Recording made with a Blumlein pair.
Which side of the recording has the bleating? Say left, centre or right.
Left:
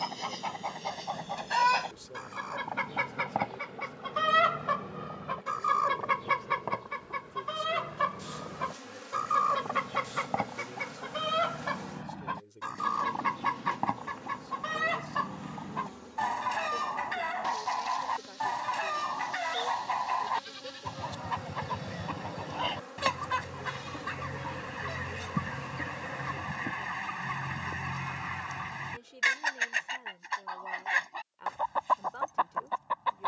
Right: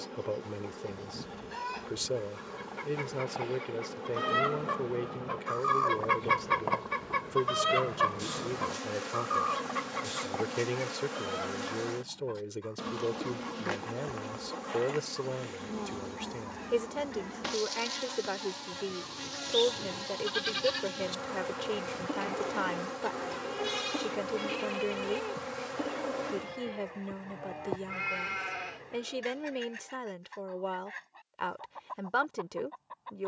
right.